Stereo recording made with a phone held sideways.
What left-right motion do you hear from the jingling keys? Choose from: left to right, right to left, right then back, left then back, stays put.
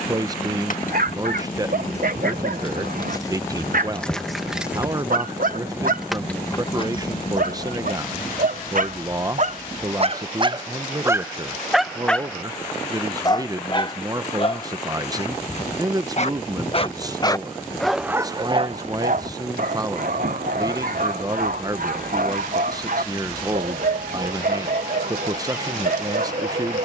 right then back.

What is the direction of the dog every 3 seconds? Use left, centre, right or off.
right, right, right, right, left, left, right, right, right.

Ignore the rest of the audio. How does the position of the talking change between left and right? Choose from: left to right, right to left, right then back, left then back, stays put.
stays put.